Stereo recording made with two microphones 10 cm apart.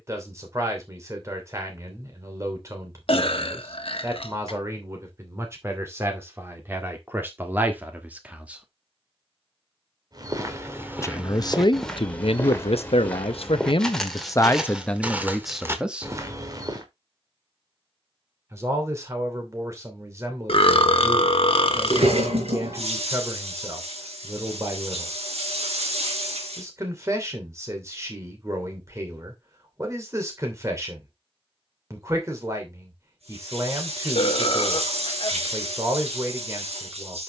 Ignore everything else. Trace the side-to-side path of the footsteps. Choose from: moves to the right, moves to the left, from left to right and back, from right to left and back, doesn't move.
from right to left and back.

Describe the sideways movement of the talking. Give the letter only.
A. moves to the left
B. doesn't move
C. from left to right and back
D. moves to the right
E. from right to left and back
E.